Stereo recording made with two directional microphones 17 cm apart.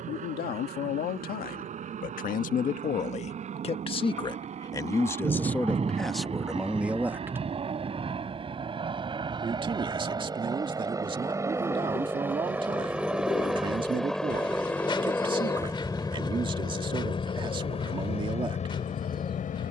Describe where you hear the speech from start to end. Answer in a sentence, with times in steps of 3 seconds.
In this clip you hear the speech on the left from 0 s, in the centre from 6 s and on the right from 9 s.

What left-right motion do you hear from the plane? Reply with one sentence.
In this clip you hear the plane go from the right side to the left.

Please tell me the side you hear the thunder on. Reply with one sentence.
In this clip you hear the thunder on the right.